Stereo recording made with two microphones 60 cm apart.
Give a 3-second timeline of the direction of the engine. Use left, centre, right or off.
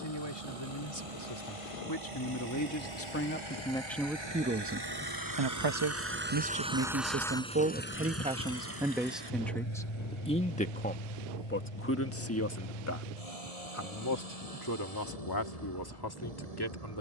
right, right, centre, left, left, left.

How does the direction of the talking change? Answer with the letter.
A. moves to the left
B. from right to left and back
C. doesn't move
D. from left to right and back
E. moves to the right
D.